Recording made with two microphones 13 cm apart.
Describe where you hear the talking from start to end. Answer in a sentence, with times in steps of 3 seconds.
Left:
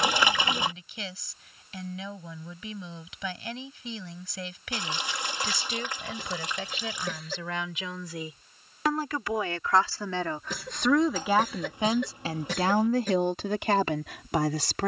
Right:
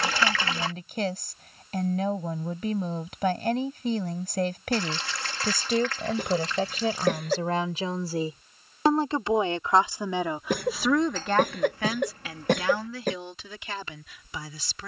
In this clip you hear the talking on the right from 0 s, in the centre from 9 s and on the left from 12 s.